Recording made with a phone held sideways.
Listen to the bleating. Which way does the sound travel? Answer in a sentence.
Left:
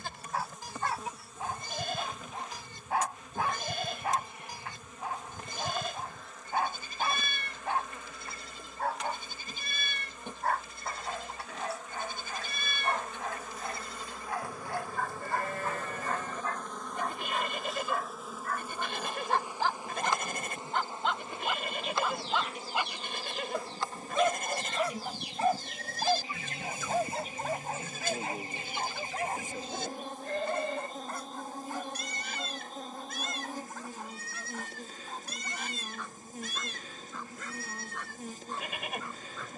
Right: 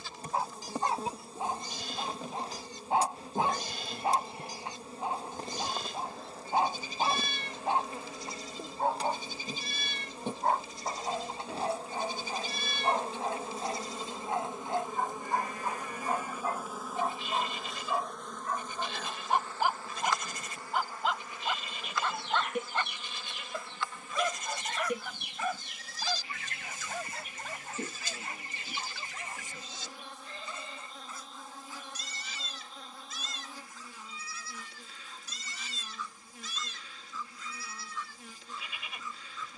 You can hear the bleating stay put.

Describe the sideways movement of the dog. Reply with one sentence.
You can hear the dog move from right to left.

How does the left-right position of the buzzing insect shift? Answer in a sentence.
In this clip you hear the buzzing insect move from right to left.